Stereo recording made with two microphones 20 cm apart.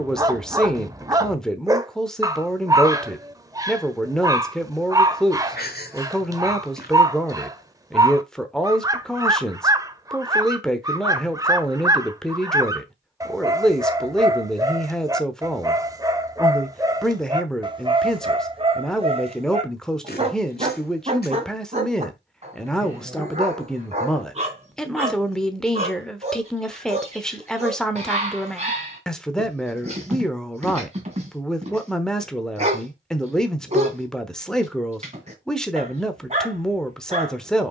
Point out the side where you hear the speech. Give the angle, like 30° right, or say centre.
centre.